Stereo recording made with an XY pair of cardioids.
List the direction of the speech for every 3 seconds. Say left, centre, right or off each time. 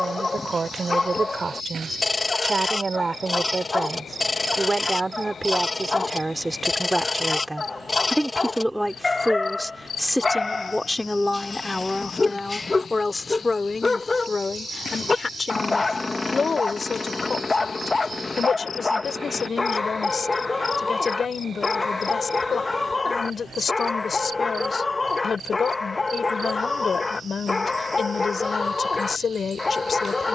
right, right, centre, centre, left, left, left, left, left, left.